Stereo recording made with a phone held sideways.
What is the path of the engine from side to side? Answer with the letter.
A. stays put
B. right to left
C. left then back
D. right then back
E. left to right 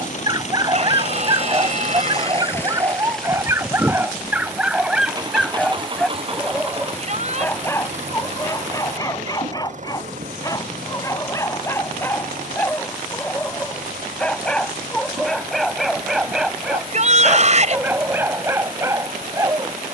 E.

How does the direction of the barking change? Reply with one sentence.
You can hear the barking go left and come back.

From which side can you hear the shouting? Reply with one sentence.
In this clip you hear the shouting on the right.